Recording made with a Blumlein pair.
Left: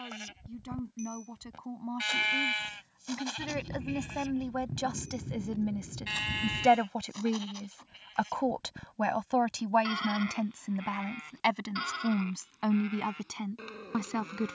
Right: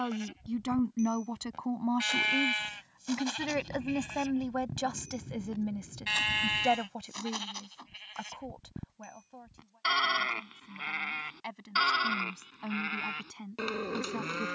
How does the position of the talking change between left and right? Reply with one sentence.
You can hear the talking move to the left.